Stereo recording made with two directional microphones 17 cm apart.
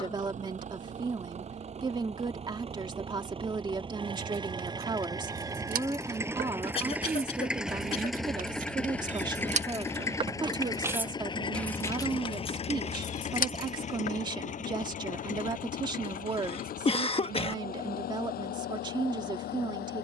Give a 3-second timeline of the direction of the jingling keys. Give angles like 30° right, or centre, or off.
off, 70° right, 60° right, 20° right, 50° left, off, off.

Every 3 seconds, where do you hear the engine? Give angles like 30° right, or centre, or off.
40° right, 30° right, centre, 20° left, 40° left, 60° left, 60° left.